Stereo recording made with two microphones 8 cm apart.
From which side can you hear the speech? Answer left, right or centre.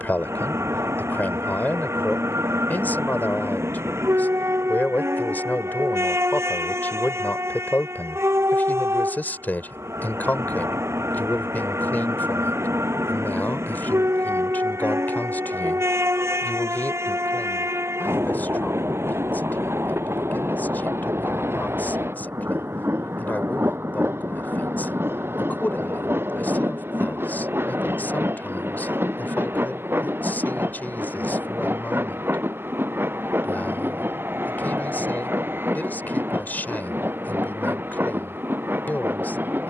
left.